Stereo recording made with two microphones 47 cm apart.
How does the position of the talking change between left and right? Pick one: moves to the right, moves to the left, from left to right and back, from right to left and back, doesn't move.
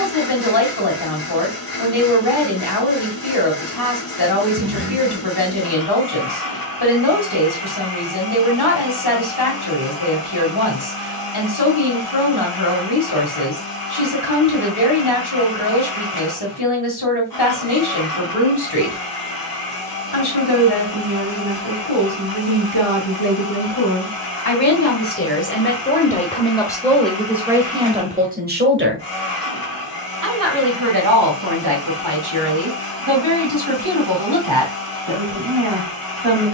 moves to the right.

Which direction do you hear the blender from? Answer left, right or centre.
left.